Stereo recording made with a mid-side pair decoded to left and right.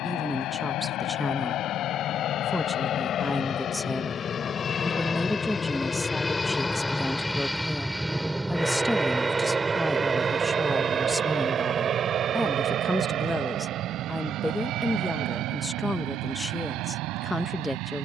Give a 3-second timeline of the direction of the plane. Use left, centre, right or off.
left, left, centre, right, right, right.